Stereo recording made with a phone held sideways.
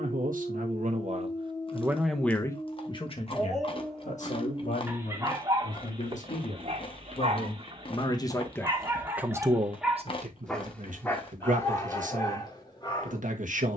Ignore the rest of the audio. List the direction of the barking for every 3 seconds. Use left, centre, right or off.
left, centre, right, centre, left.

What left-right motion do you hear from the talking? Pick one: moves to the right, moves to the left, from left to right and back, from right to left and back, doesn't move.
from right to left and back.